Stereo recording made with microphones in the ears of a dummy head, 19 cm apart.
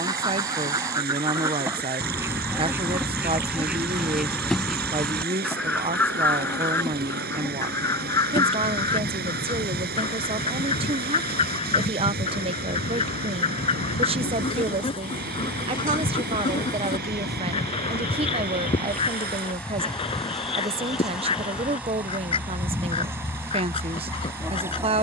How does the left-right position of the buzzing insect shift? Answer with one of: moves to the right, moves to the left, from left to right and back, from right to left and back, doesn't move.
from right to left and back.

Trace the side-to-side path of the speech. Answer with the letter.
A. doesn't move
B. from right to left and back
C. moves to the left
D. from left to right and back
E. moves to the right
A.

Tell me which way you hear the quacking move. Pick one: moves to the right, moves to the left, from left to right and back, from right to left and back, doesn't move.
moves to the left.